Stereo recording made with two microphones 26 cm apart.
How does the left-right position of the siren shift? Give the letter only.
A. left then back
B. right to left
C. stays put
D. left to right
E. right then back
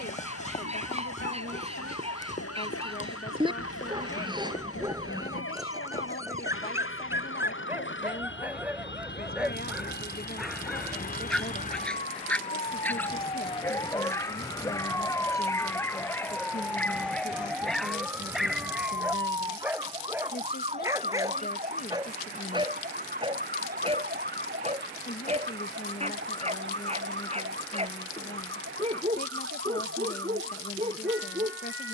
D.